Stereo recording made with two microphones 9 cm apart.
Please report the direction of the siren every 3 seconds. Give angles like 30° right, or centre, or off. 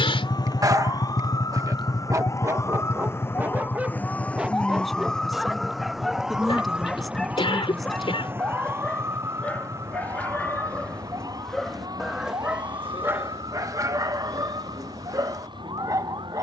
40° left, 10° left, 20° right, 40° right, 50° right, 60° right.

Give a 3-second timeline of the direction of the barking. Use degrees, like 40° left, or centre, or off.
40° right, 10° right, 10° left, 10° left, 30° right, 40° right.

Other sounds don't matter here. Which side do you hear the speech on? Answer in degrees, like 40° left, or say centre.
centre.